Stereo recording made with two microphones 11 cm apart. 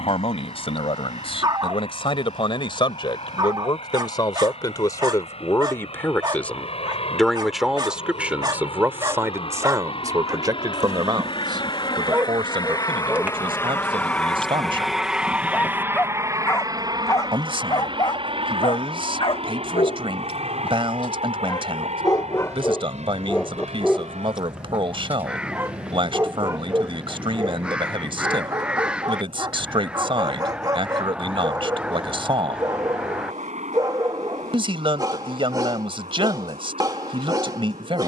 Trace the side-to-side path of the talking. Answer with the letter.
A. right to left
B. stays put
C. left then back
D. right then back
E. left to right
E.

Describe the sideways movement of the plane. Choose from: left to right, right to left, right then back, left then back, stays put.
left to right.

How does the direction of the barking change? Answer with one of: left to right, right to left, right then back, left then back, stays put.
left then back.